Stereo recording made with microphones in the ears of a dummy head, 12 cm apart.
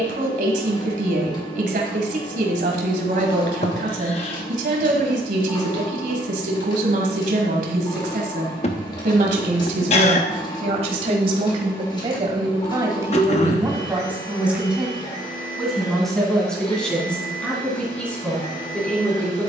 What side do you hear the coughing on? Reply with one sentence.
In this clip you hear the coughing on the left.